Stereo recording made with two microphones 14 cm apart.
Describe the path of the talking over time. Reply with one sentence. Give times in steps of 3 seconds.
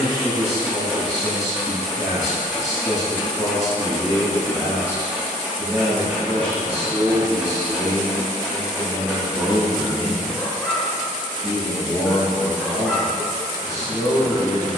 You can hear the talking on the left from 0 s, on the right from 6 s, in the centre from 9 s and on the left from 12 s.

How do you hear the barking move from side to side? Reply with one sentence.
In this clip you hear the barking stay put.